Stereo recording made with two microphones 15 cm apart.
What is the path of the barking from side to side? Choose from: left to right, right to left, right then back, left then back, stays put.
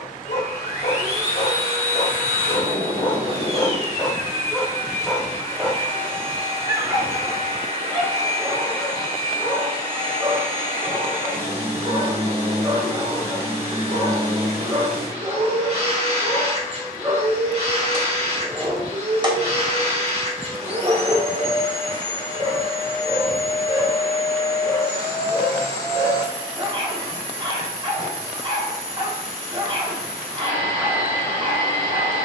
left to right.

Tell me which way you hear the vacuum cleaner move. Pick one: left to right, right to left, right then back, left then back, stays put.
stays put.